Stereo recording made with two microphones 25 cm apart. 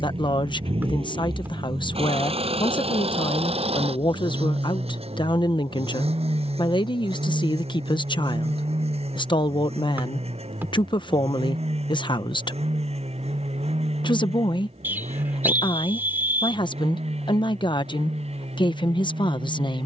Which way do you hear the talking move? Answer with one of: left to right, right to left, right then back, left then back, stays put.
stays put.